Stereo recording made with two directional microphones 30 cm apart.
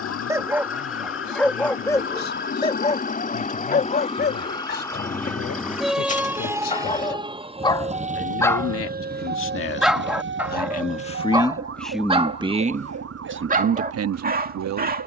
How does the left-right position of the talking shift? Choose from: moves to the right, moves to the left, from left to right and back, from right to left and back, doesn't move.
moves to the right.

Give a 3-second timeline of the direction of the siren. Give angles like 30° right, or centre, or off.
40° left, 10° left, 20° right, 40° right, 50° right.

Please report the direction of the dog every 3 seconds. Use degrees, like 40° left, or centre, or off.
10° left, 30° left, 20° left, 10° right, 30° right.